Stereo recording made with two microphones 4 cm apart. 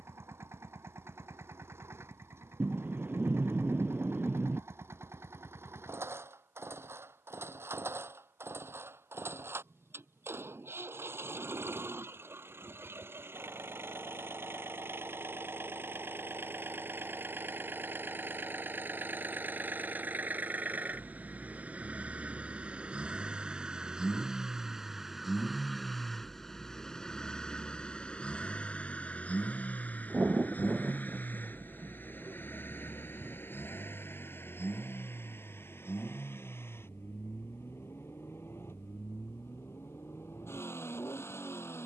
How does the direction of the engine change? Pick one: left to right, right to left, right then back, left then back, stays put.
right to left.